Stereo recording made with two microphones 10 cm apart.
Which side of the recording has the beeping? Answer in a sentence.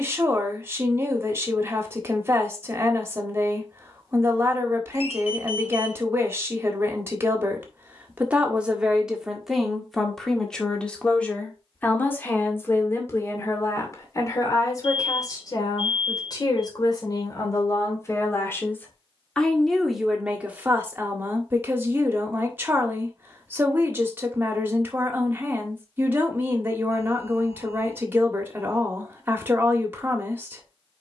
You can hear the beeping on the left.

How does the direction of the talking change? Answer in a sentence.
In this clip you hear the talking move from right to left and back again.